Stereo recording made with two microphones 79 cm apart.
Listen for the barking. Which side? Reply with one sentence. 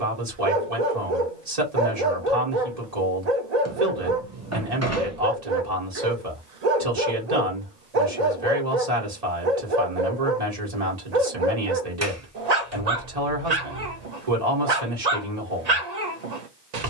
In this clip you hear the barking on the right.